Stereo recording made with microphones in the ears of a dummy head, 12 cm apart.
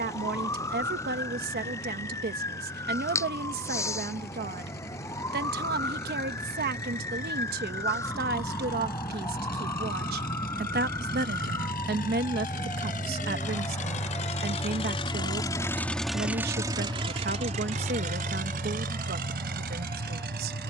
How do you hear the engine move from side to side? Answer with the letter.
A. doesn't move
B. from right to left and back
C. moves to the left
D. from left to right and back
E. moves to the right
E.